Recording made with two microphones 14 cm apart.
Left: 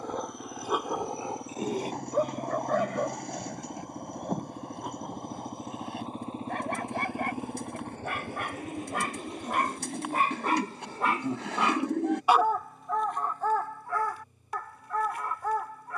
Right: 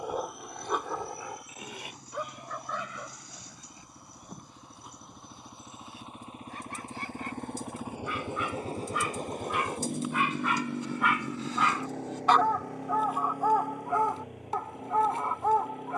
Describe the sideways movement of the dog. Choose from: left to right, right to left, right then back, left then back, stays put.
left then back.